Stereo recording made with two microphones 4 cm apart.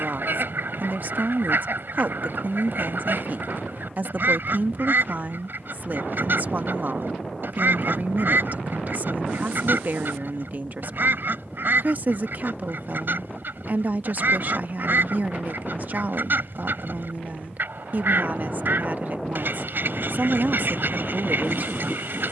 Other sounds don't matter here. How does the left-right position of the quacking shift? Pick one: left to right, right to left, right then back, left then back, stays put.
stays put.